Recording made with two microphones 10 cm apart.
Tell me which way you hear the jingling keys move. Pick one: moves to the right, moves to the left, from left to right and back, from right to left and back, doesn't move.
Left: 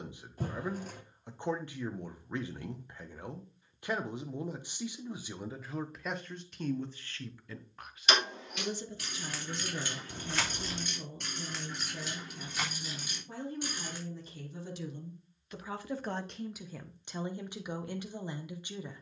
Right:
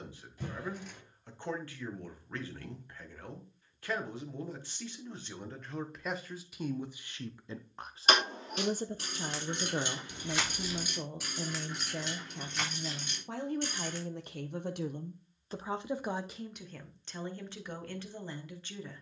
moves to the left.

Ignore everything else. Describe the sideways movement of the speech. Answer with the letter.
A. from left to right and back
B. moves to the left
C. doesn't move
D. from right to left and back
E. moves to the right
A.